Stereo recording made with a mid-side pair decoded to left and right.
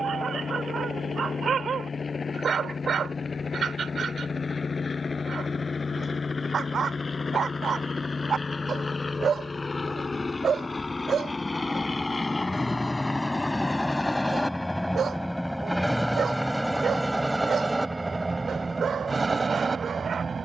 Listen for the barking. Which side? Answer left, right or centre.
right.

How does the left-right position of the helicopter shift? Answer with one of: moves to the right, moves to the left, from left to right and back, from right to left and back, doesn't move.
moves to the right.